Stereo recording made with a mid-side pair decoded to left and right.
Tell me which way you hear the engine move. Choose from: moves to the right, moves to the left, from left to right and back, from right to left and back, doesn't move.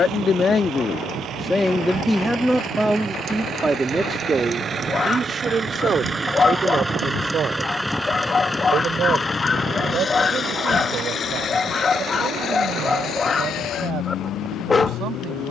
moves to the left.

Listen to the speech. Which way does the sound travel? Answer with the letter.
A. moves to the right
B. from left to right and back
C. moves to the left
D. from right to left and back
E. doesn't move
A.